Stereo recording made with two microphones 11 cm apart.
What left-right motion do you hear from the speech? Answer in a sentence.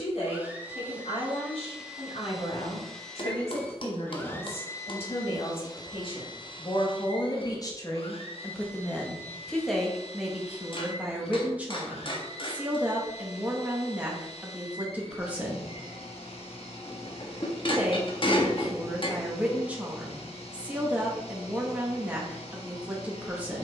In this clip you hear the speech travel towards the right.